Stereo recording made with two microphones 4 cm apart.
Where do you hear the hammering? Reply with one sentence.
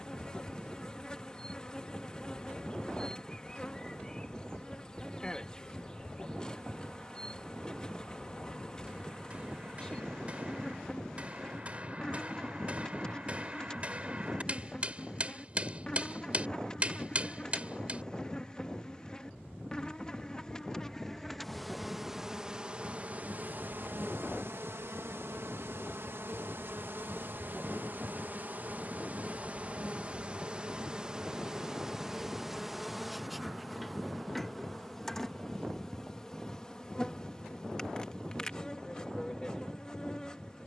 You can hear the hammering on the right.